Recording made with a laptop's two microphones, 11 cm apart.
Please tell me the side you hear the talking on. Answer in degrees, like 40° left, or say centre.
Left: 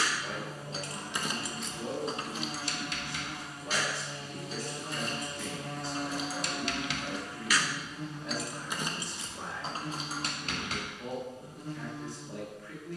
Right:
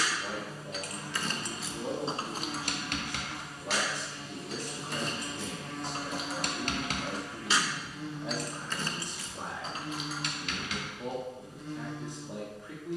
20° right.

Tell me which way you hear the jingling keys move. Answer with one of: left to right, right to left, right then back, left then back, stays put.
right then back.